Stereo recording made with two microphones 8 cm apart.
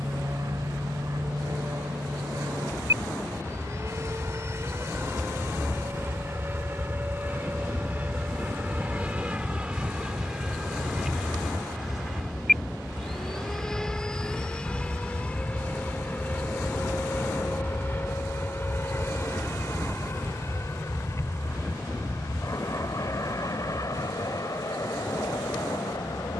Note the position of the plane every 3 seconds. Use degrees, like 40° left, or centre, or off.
50° right, 30° right, 20° right, 10° right, 10° left, 20° left, 30° left, 40° left, 50° left.